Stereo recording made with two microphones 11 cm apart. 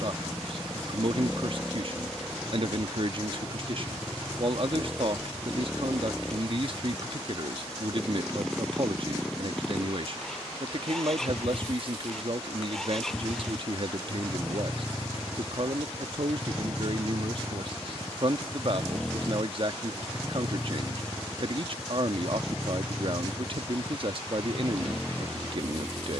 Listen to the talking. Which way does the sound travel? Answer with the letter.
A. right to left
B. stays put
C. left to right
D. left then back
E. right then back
B.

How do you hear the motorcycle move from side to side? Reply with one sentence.
You can hear the motorcycle stay in one place.